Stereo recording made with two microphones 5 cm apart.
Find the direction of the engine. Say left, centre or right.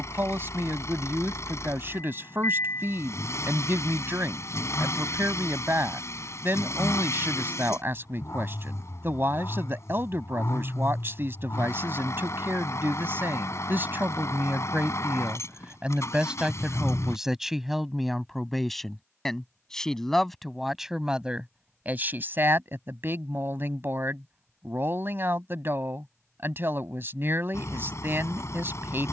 left.